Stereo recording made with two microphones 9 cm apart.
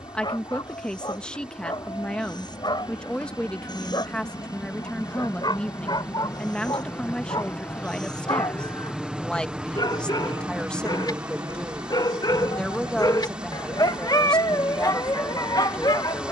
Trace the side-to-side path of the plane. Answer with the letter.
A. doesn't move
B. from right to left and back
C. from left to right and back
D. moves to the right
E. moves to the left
D.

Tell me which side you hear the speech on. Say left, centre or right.
centre.